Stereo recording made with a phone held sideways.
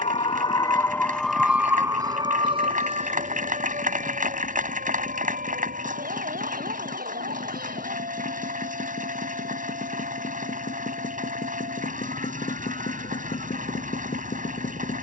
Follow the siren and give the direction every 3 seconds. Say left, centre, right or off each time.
centre, right, right, right, right.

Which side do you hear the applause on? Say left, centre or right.
right.